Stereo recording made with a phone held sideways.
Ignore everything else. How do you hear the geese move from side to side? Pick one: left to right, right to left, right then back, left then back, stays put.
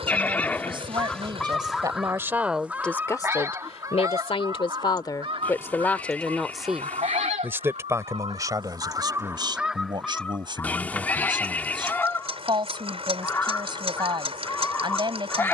right then back.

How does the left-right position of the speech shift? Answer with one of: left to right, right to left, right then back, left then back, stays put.
left then back.